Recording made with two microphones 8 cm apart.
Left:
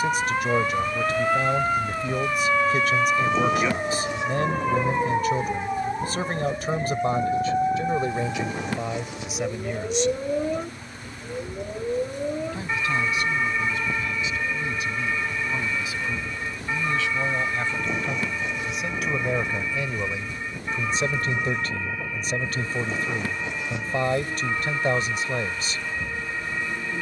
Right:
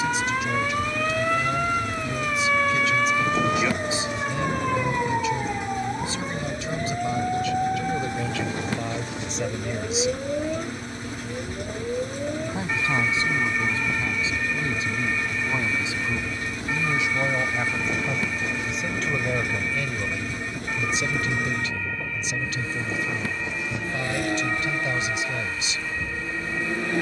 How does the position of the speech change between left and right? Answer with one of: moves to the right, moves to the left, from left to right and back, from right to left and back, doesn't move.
from left to right and back.